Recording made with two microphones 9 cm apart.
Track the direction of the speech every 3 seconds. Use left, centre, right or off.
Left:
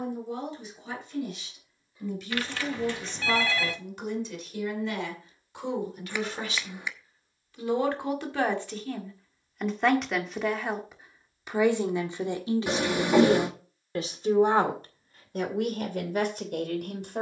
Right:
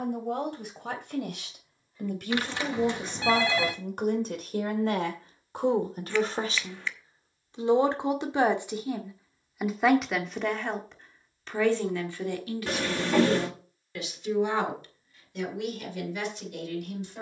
right, right, right, centre, left, left.